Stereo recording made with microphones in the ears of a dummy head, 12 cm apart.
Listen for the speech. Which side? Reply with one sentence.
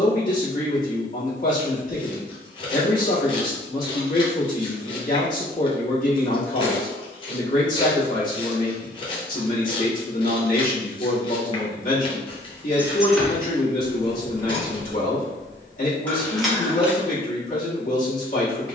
You can hear the speech on the left.